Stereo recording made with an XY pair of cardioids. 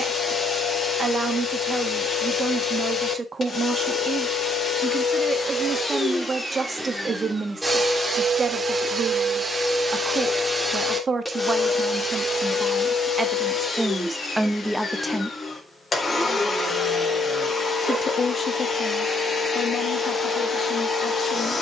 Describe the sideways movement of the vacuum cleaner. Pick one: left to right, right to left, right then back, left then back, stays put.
right then back.